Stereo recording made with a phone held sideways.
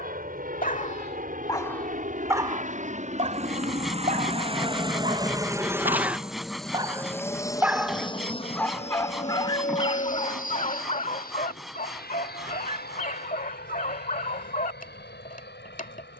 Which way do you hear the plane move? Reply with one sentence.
In this clip you hear the plane move from right to left.